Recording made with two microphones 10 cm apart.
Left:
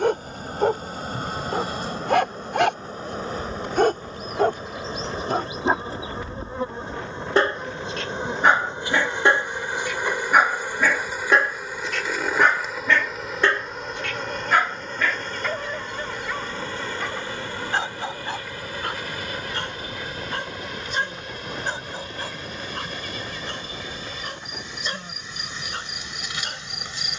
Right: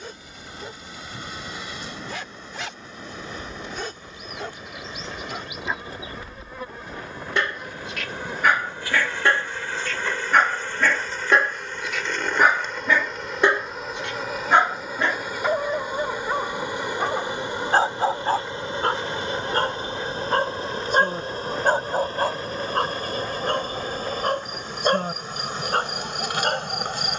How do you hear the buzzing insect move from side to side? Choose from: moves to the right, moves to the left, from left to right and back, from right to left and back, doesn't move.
moves to the right.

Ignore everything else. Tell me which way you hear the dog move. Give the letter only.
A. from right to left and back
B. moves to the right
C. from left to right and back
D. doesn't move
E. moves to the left
B.